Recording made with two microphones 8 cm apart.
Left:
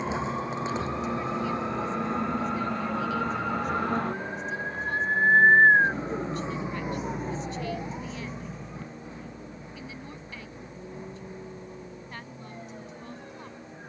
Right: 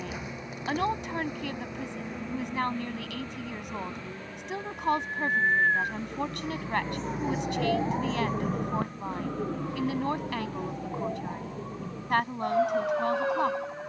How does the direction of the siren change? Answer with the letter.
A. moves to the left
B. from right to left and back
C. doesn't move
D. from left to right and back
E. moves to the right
E.